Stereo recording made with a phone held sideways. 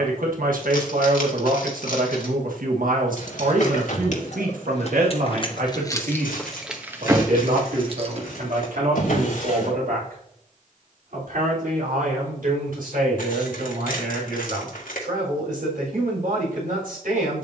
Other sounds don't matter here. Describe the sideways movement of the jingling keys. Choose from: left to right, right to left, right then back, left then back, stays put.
left to right.